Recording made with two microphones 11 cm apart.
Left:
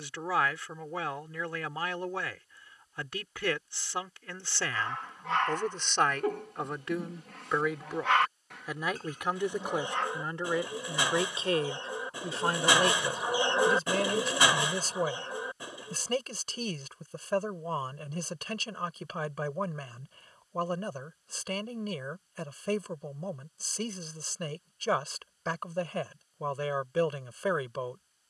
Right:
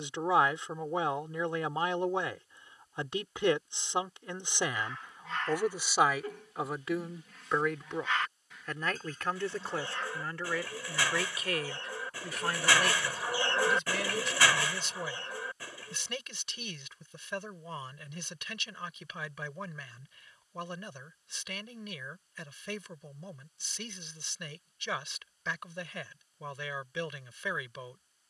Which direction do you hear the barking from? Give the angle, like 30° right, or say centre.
60° left.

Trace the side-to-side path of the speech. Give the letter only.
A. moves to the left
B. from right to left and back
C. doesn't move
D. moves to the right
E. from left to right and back
A.